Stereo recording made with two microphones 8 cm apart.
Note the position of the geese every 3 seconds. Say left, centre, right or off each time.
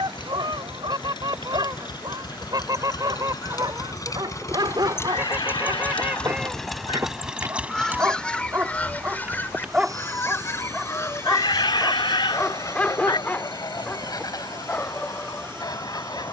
right, right, centre, left, left, left.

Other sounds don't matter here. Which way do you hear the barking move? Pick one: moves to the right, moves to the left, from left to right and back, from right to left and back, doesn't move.
moves to the left.